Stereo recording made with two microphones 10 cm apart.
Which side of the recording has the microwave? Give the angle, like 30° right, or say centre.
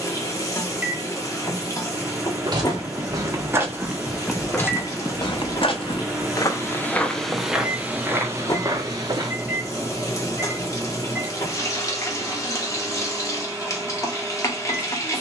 20° right.